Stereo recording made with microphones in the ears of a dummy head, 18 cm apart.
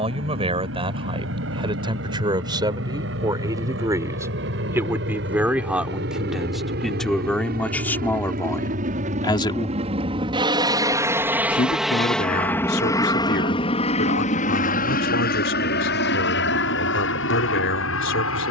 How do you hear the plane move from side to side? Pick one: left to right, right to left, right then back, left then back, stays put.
right to left.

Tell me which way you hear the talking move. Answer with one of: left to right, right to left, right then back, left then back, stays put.
right to left.